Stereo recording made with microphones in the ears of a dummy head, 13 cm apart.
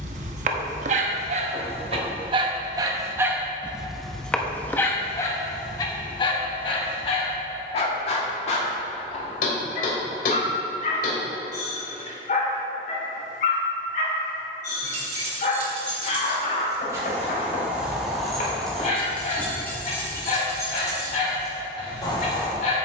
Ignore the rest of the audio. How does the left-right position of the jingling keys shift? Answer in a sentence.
In this clip you hear the jingling keys move to the left.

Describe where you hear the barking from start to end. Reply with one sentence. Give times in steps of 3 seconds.
In this clip you hear the barking on the right from 0 s, in the centre from 3 s and on the left from 6 s.